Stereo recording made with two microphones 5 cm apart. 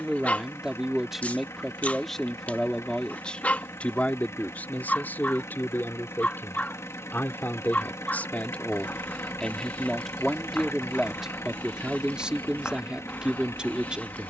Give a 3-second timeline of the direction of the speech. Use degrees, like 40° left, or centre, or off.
centre, 40° left, 40° left, centre, 20° right.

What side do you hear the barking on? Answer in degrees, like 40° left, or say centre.
30° left.